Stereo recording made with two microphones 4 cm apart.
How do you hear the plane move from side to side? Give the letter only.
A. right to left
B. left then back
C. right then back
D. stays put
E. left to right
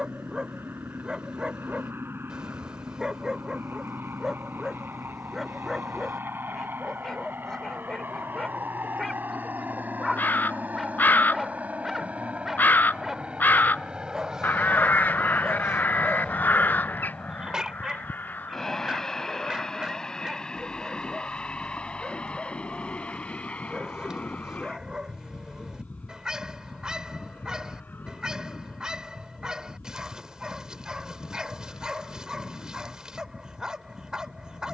A.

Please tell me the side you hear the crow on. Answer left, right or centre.
left.